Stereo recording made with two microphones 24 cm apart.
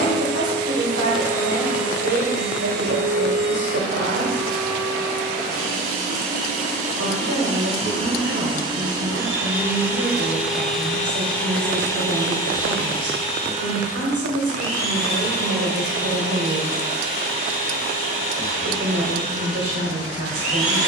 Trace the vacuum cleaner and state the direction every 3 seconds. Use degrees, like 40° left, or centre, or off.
50° right, 40° right, 30° right, centre, 30° left, 50° left, 60° left.